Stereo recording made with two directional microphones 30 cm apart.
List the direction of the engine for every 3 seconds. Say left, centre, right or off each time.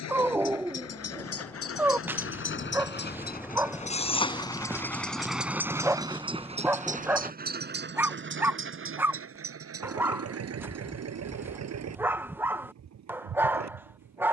left, centre, right, right, right.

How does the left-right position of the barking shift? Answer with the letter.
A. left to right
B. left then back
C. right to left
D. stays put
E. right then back
D.